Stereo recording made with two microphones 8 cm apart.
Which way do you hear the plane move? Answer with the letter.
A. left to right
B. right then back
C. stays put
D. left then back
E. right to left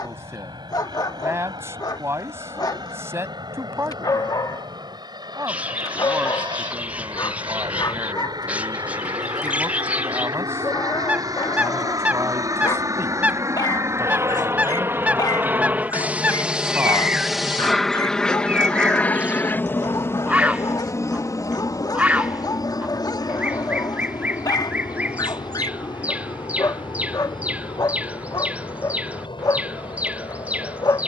E.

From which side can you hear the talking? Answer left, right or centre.
right.